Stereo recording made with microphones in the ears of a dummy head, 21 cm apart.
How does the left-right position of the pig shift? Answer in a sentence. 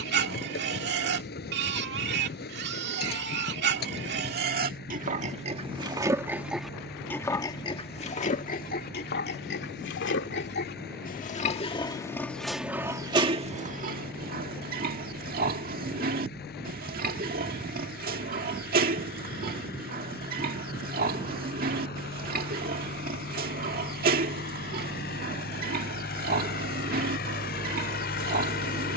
You can hear the pig go left and come back.